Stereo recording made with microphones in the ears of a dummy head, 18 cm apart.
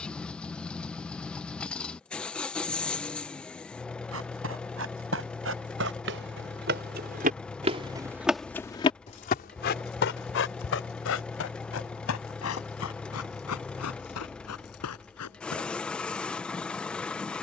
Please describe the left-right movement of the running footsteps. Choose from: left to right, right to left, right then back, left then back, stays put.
right to left.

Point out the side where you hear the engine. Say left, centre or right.
centre.